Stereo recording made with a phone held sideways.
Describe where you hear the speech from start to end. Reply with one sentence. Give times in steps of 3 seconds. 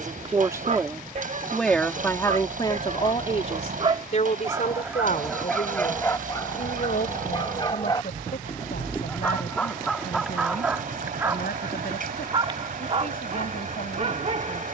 You can hear the speech in the centre from 0 s and on the left from 3 s.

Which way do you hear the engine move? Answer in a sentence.
In this clip you hear the engine stay in one place.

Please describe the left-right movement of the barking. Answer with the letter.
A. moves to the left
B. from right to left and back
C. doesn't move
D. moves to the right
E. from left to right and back
B.